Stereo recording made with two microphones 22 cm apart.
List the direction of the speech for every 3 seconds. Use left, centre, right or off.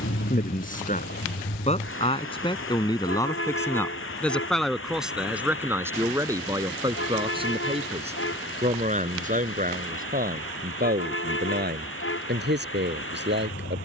left, centre, right, right, right.